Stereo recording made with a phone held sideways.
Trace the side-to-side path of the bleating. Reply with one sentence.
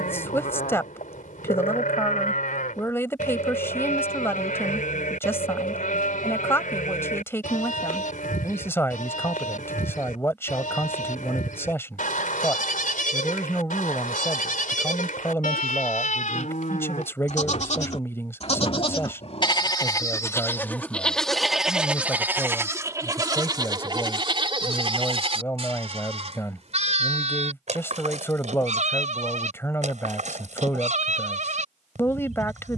You can hear the bleating move to the right.